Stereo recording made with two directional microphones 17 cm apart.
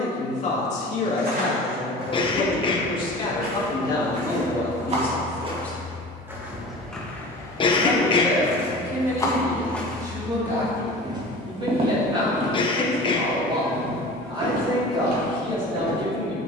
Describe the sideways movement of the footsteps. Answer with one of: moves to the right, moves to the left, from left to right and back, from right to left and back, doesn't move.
from right to left and back.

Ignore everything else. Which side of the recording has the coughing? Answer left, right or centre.
left.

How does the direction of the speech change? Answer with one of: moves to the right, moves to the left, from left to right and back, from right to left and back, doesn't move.
moves to the right.